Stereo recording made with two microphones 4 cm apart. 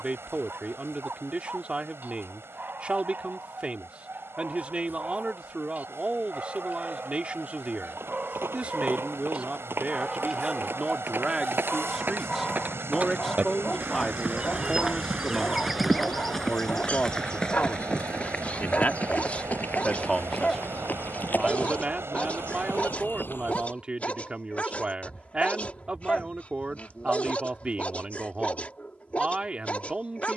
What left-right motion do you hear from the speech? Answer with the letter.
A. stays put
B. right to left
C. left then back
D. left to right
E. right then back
C.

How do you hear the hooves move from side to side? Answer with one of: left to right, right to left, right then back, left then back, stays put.
right to left.